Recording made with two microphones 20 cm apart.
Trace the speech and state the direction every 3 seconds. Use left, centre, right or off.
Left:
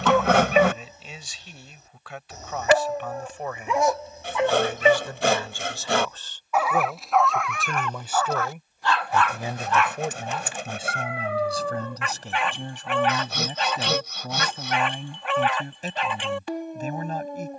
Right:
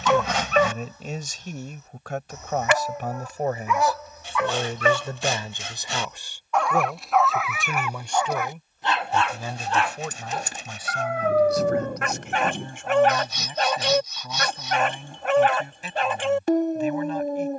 right, right, centre, left, left, left.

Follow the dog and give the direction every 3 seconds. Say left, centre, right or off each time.
left, left, centre, right, right, right.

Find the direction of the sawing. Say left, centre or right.
left.